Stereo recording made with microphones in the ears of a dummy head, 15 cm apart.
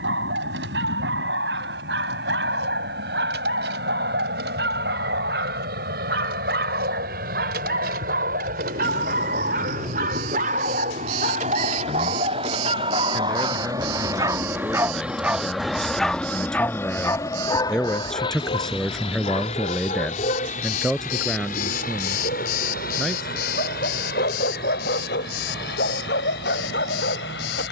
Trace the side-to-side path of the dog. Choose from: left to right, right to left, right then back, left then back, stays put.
right to left.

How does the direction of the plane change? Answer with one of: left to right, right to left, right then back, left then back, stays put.
right to left.